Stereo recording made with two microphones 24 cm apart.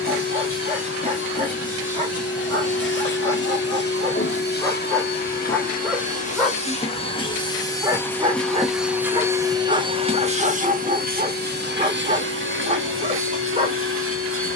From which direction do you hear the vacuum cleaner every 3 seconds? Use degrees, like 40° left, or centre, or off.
60° left, 40° left, 20° left, 30° right, 60° right.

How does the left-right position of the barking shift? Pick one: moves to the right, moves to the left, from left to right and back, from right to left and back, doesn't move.
moves to the right.